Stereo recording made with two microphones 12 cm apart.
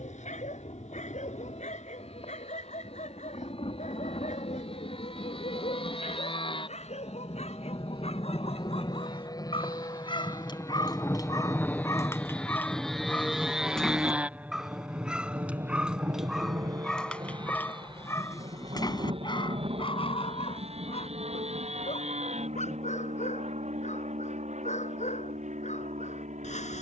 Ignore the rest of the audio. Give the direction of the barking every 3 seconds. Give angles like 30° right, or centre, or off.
80° left, 80° left, 60° left, 40° left, 10° left, centre, 40° left, 70° left, 80° left.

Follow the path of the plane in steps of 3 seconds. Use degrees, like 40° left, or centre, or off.
60° left, 60° left, 40° left, 30° left, centre, 30° right, 50° right, 60° right, 60° right.